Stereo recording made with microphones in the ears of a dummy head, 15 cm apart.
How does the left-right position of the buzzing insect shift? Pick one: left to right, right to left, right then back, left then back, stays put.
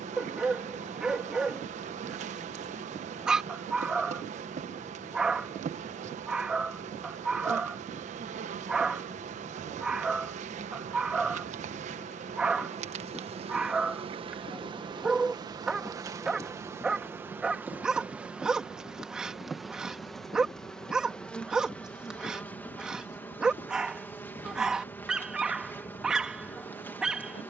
right to left.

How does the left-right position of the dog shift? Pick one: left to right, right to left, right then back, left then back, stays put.
stays put.